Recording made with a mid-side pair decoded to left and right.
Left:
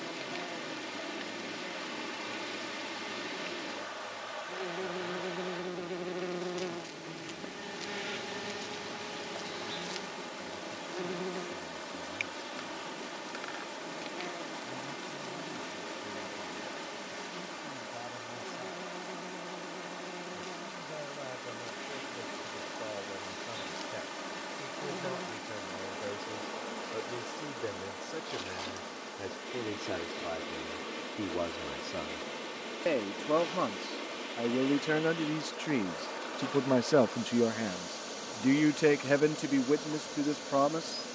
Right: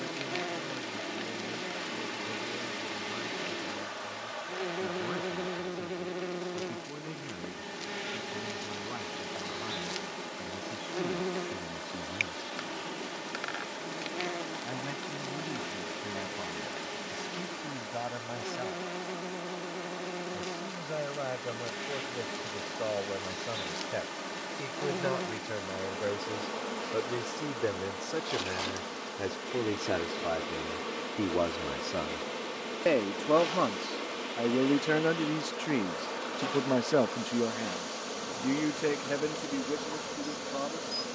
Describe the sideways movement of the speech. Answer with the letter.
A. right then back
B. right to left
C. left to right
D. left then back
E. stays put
B.